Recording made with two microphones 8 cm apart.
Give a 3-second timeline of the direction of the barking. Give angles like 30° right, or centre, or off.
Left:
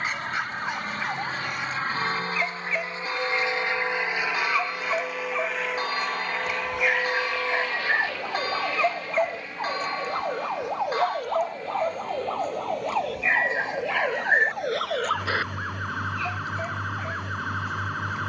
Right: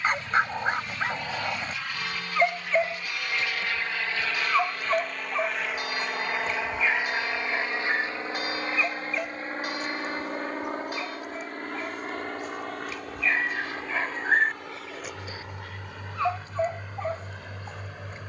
30° right, 10° right, 20° left, 50° left, 20° left, 30° right.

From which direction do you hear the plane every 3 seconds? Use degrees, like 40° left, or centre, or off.
40° left, 10° left, 20° right, 40° right, 50° right, 60° right.